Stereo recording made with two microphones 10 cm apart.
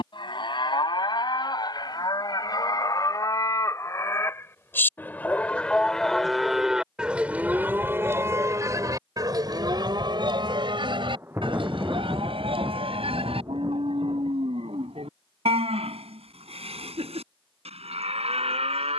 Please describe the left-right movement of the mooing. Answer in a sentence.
You can hear the mooing go from the left side to the right.